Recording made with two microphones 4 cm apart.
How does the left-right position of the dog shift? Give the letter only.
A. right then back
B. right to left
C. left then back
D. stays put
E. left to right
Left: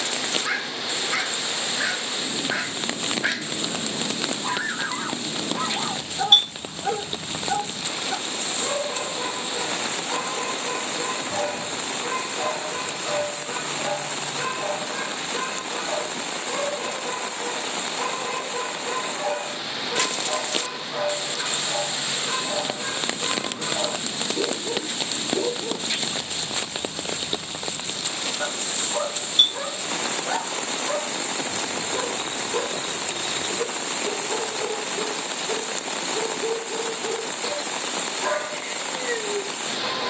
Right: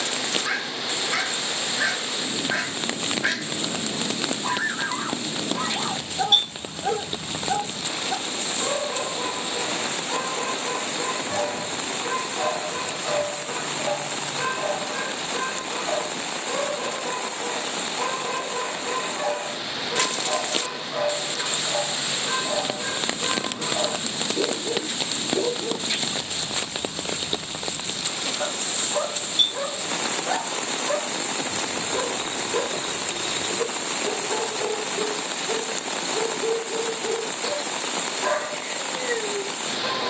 D.